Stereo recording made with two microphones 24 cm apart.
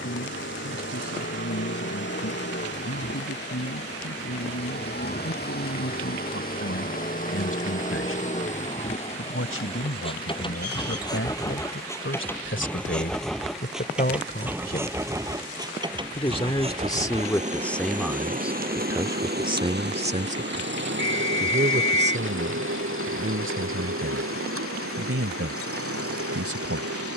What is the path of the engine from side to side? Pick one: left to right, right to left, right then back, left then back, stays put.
left to right.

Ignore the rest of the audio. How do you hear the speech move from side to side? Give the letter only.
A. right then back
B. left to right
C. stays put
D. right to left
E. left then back
B.